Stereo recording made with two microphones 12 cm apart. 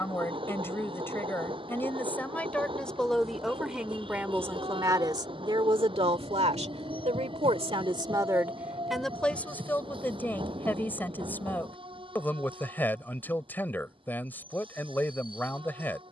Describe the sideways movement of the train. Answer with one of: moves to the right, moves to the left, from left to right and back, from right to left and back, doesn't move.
doesn't move.